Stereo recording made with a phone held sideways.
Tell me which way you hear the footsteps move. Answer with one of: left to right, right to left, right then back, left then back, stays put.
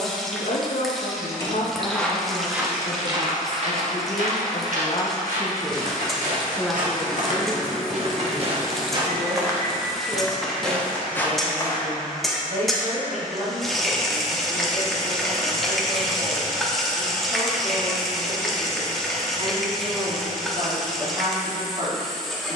right then back.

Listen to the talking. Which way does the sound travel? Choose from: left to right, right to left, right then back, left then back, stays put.
left to right.